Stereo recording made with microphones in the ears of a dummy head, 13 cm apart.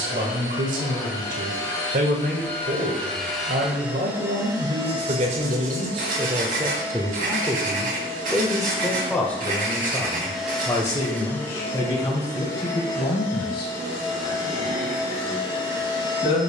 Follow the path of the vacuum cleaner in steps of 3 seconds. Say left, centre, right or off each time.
left, right, right, centre, left, left.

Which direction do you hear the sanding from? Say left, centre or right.
right.